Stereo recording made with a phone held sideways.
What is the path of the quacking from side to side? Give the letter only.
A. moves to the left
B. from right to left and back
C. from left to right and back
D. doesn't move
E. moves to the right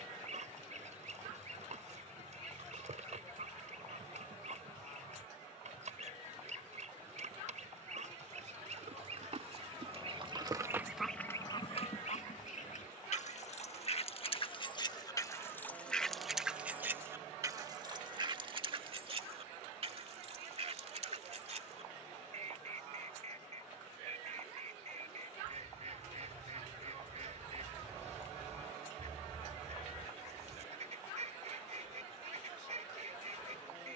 B.